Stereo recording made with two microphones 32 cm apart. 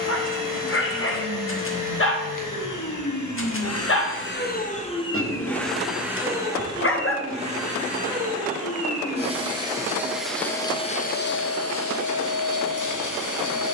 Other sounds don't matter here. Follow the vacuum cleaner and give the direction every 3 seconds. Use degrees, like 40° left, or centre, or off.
80° left, 30° left, 20° right, 10° left, 70° left.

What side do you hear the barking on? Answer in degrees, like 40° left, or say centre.
40° left.